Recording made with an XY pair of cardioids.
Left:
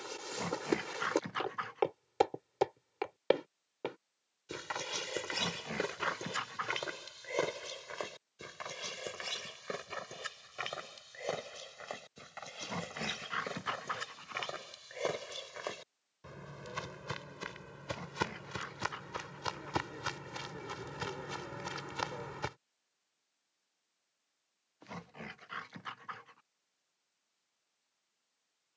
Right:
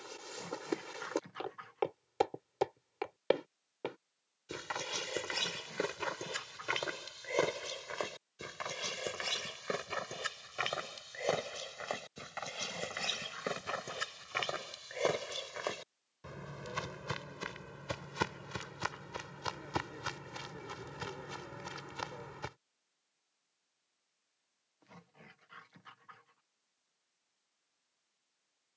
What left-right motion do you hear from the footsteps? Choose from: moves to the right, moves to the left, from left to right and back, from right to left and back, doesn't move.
from left to right and back.